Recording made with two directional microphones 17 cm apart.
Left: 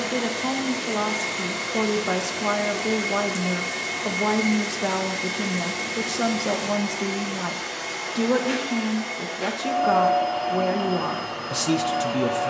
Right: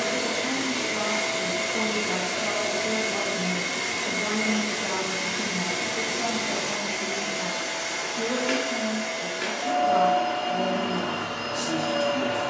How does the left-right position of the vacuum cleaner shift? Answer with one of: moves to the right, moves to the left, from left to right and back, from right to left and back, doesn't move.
doesn't move.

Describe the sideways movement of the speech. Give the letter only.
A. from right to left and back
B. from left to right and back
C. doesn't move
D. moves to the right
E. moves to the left
C.